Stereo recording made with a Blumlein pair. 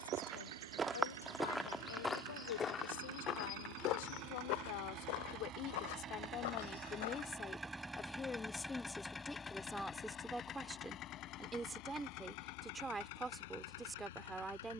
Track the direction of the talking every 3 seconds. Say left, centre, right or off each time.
left, left, left, centre, centre.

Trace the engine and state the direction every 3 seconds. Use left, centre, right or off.
right, right, centre, left, left.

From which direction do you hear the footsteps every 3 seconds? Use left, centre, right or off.
centre, left, left, off, off.